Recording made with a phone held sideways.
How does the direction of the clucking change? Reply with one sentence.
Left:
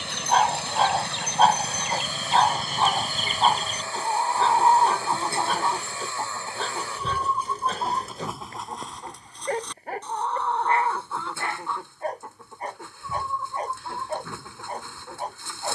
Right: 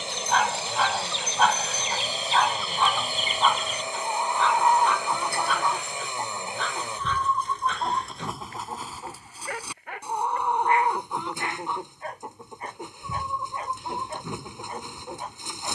You can hear the clucking go from the left side to the right.